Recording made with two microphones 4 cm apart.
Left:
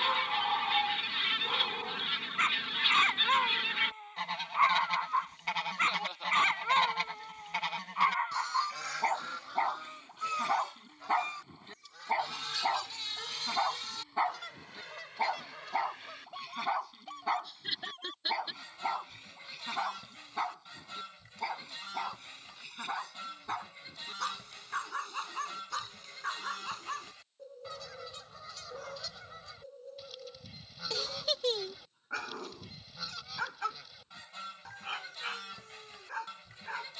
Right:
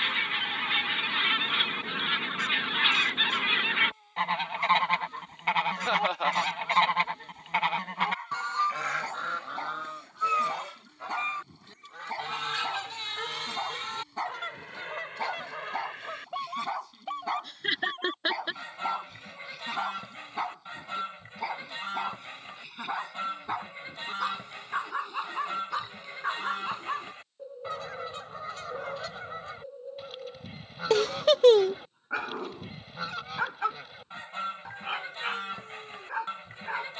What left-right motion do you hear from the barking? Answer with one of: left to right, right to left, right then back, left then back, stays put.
left to right.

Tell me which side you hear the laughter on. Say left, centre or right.
right.